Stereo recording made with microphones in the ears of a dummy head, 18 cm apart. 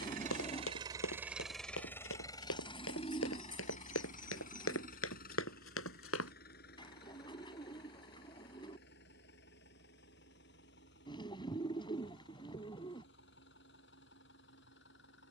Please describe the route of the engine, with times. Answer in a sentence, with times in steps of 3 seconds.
In this clip you hear the engine in the centre from 0 s and on the left from 3 s.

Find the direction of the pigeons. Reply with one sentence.
In this clip you hear the pigeons on the left.